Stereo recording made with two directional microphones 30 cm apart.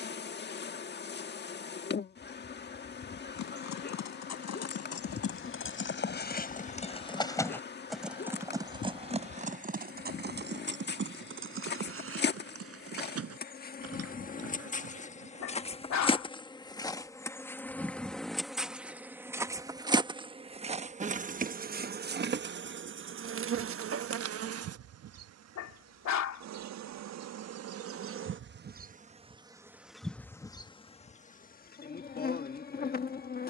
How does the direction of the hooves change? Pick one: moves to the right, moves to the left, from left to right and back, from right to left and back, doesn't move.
moves to the right.